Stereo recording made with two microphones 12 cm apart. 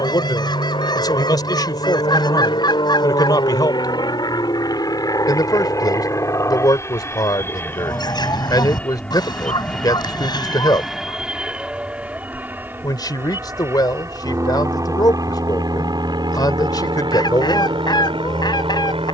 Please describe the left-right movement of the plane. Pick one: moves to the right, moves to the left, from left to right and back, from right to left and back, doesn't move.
moves to the right.